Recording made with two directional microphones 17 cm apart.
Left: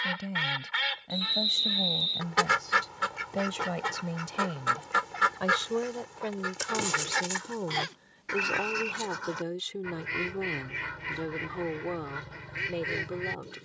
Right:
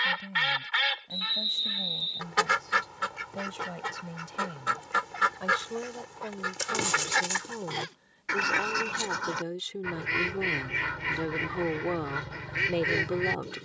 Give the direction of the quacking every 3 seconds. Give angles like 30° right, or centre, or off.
10° right, centre, 20° right, 40° right, 40° right.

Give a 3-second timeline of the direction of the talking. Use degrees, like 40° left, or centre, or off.
40° left, 30° left, 20° left, 10° right, 40° right.